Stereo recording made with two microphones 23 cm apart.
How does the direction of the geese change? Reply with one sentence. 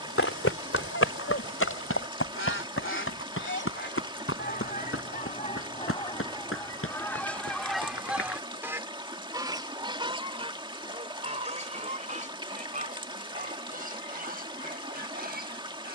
In this clip you hear the geese move from left to right.